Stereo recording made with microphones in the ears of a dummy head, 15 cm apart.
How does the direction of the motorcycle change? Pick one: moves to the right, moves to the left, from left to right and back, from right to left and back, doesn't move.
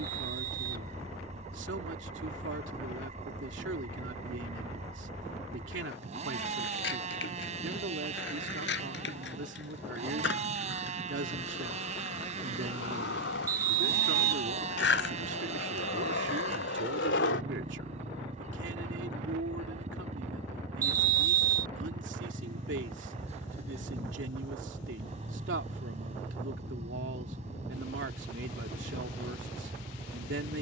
doesn't move.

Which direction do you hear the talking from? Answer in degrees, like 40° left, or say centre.
70° right.